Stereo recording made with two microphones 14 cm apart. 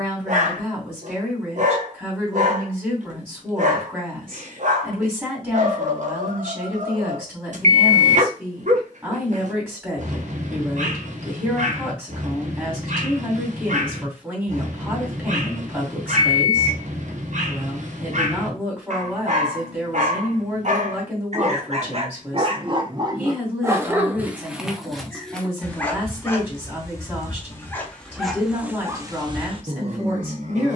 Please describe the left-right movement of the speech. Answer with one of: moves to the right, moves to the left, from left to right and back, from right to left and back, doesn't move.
doesn't move.